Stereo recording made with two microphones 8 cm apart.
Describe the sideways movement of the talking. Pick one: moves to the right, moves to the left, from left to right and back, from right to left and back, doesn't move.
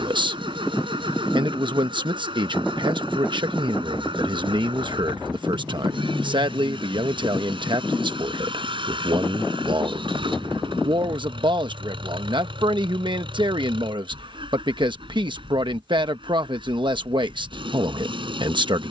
doesn't move.